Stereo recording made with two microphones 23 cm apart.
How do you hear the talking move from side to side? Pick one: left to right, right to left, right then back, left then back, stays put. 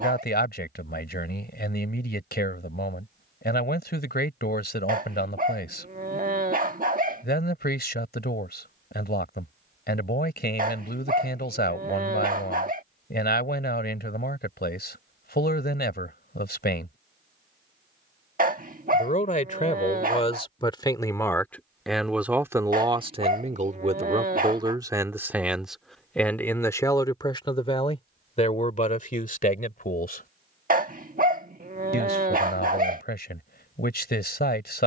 right then back.